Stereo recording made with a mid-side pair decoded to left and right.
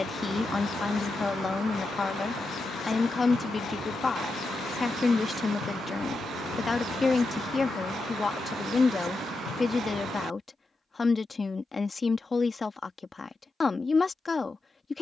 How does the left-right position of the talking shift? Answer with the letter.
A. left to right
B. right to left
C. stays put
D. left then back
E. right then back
C.